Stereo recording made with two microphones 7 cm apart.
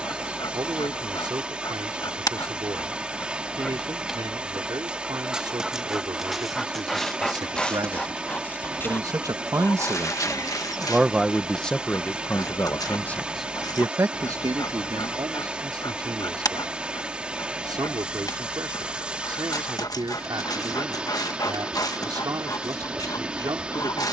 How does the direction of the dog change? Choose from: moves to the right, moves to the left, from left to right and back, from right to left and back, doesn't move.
from left to right and back.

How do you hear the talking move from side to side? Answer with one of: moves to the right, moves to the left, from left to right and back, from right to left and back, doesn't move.
from right to left and back.